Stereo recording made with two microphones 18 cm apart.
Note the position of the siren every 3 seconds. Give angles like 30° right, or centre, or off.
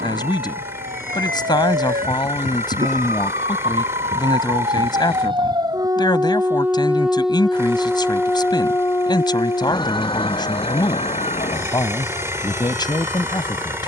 60° right, 40° right, centre, 30° left, 50° left.